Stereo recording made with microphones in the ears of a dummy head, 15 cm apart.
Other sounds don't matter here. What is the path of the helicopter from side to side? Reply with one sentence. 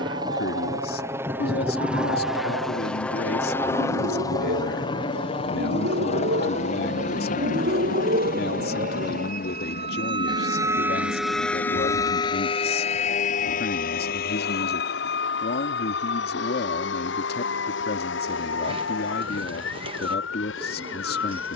In this clip you hear the helicopter move to the left.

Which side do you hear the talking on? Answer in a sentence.
In this clip you hear the talking on the left.